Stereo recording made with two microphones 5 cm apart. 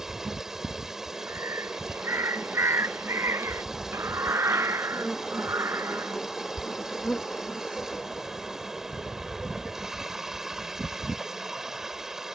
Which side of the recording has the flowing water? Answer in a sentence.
You can hear the flowing water in the centre.